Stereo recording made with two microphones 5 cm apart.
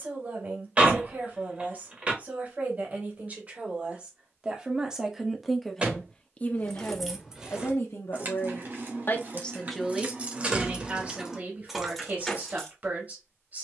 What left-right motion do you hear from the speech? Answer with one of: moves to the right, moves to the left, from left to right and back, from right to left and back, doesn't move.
from right to left and back.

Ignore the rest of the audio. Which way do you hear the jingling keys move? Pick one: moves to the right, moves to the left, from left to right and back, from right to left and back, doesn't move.
from left to right and back.